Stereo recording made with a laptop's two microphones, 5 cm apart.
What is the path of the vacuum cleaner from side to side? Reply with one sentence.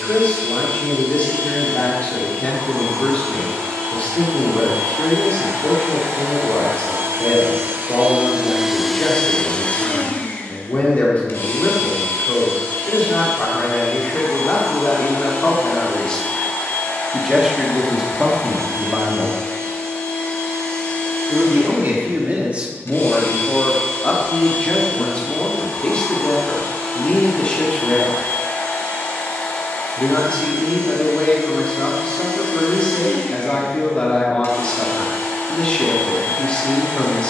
In this clip you hear the vacuum cleaner move to the left.